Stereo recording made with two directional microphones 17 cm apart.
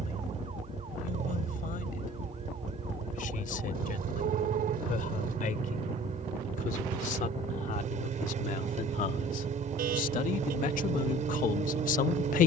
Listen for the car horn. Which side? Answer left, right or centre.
right.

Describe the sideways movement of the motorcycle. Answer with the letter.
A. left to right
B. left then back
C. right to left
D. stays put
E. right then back
D.